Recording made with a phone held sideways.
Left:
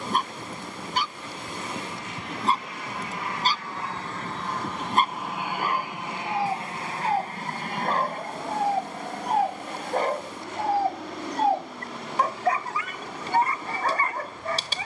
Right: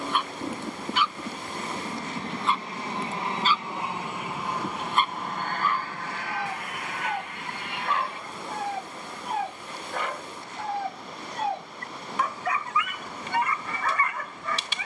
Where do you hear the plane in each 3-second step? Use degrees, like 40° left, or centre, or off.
40° right, 10° right, 40° left, 60° left, 70° left.